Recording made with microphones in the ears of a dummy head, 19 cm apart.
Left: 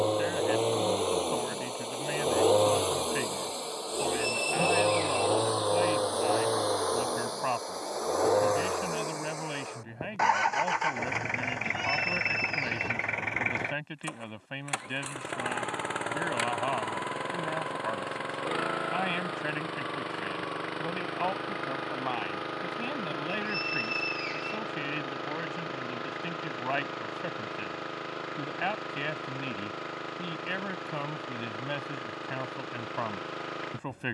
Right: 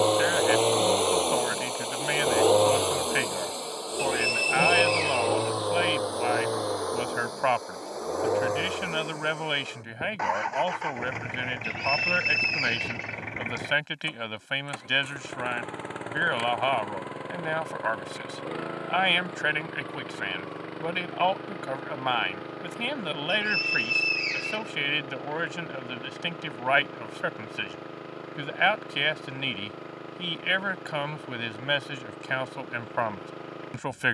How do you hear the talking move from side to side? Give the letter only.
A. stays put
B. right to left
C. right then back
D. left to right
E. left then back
A.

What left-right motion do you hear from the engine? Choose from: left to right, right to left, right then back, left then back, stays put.
right to left.